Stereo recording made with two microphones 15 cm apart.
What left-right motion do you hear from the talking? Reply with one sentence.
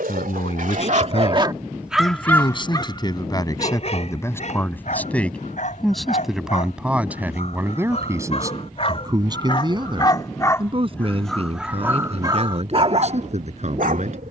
In this clip you hear the talking go from the left side to the right.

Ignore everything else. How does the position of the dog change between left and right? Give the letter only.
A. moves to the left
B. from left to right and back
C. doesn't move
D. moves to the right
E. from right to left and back
E.